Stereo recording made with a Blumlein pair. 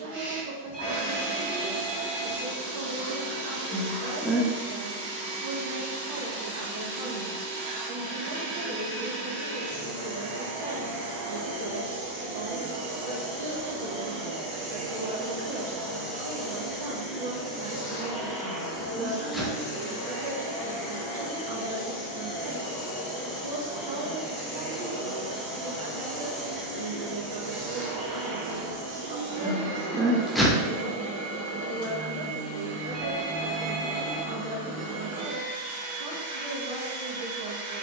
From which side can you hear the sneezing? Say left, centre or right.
centre.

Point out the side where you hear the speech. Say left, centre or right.
right.